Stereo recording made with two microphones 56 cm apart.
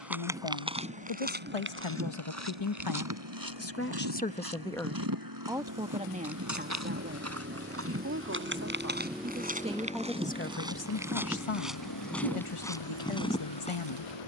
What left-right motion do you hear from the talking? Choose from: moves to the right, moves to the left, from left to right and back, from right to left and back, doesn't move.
from left to right and back.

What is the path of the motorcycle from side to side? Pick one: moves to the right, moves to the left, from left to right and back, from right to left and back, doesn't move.
moves to the left.